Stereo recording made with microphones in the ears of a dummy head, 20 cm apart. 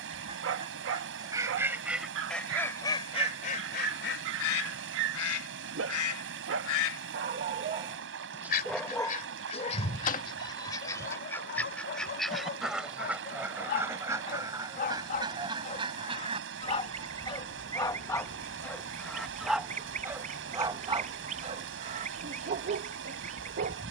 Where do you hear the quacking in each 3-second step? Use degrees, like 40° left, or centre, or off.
10° right, 50° left, 50° left, 20° left, 10° right, 20° right, 30° right, 30° right.